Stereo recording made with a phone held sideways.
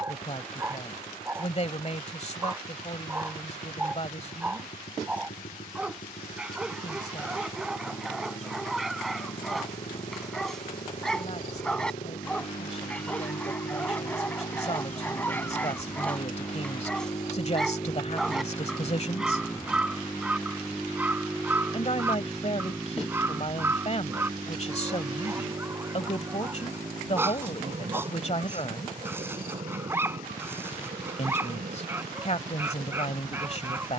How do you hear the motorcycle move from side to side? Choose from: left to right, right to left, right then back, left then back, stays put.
left to right.